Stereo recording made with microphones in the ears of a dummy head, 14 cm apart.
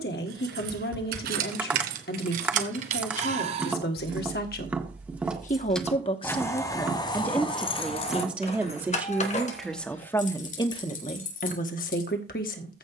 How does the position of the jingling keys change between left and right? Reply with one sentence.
In this clip you hear the jingling keys go from the right side to the left.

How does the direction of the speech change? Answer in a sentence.
You can hear the speech go right and come back.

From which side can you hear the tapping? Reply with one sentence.
You can hear the tapping in the centre.